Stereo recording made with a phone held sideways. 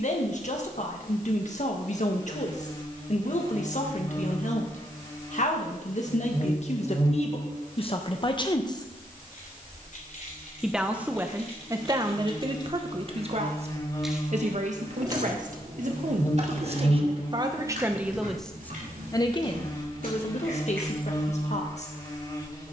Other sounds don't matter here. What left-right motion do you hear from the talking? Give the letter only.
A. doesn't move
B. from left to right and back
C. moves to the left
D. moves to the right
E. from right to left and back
B.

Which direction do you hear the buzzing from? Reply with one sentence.
You can hear the buzzing on the left.